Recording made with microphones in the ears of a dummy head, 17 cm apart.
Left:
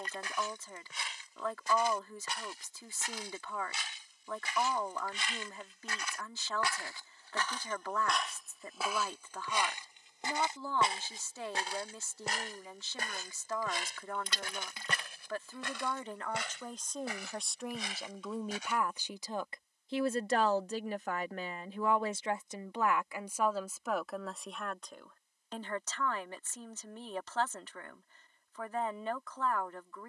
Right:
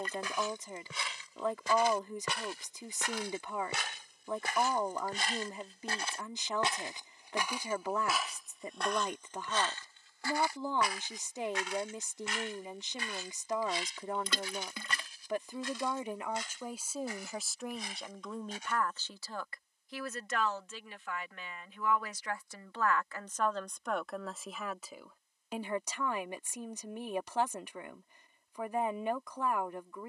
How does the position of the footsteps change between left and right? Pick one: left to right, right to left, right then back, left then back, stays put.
right to left.